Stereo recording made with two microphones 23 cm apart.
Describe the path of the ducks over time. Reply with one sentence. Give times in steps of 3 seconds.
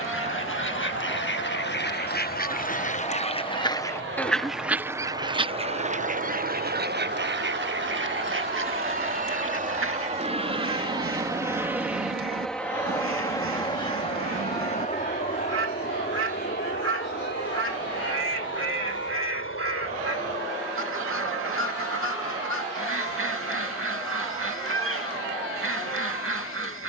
In this clip you hear the ducks on the left from 0 s, in the centre from 3 s and on the right from 6 s.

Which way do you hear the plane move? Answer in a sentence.
You can hear the plane go from the right side to the left.